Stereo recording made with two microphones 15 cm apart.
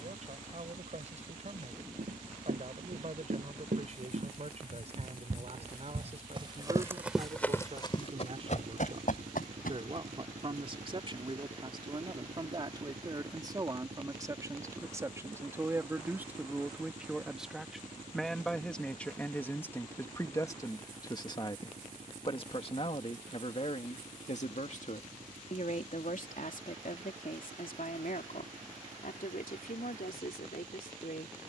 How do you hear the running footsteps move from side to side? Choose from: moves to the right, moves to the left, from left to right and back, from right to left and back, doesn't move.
moves to the left.